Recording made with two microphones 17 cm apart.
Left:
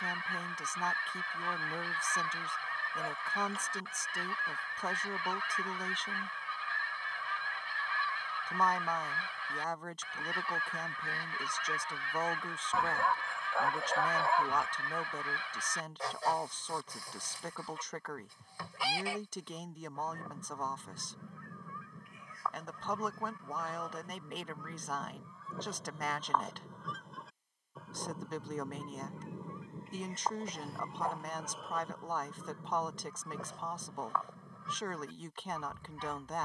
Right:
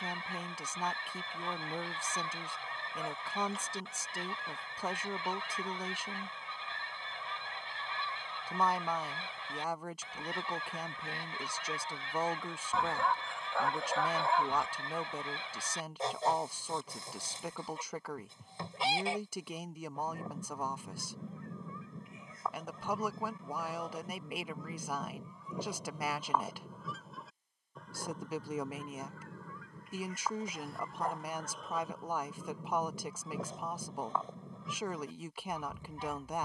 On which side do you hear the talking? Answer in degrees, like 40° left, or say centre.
10° right.